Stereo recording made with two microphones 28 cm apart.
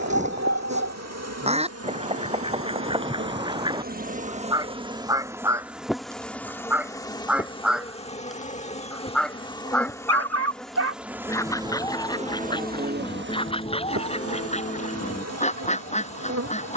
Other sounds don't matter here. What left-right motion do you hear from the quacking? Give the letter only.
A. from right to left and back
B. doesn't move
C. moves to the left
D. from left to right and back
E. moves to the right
C.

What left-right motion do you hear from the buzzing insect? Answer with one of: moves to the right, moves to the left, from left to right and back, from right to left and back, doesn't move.
from right to left and back.